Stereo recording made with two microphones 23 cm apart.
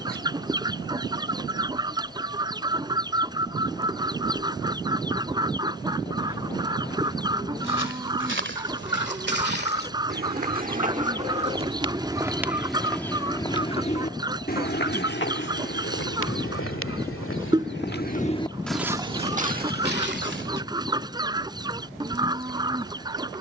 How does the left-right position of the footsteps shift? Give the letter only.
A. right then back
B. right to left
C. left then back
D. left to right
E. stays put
C.